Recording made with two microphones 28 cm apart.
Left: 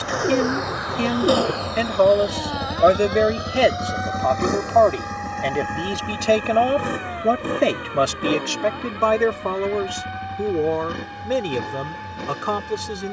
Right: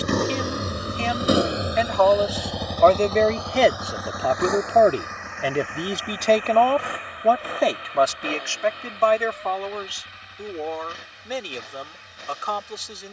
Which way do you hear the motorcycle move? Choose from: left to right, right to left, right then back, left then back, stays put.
right to left.